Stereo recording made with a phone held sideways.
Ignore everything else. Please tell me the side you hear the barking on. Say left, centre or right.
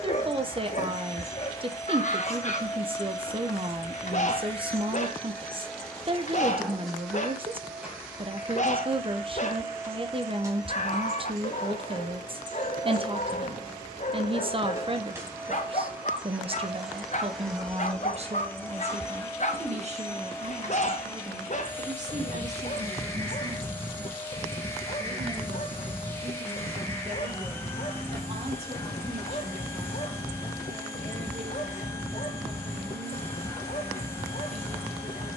left.